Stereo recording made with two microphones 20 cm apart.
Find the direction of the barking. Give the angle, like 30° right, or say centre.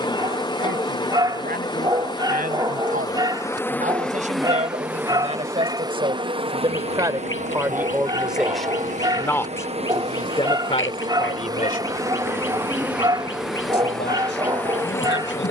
20° right.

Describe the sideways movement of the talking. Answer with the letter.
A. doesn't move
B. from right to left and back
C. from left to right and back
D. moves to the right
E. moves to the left
E.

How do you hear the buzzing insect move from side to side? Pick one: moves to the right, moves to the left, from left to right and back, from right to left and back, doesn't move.
from left to right and back.